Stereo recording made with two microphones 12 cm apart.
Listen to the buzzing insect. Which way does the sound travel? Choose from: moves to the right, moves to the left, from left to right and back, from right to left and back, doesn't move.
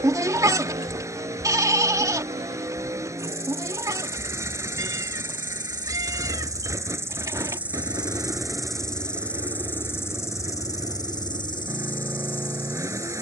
moves to the left.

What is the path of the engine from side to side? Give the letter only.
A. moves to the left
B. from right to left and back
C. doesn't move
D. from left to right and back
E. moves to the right
C.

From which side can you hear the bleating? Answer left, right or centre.
right.